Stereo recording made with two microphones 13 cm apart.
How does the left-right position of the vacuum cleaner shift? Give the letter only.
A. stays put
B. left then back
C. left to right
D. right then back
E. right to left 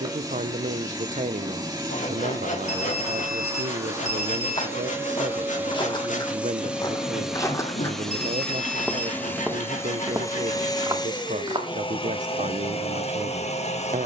E.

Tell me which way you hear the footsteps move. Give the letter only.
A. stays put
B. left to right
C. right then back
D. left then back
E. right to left
B.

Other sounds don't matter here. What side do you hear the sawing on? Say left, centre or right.
left.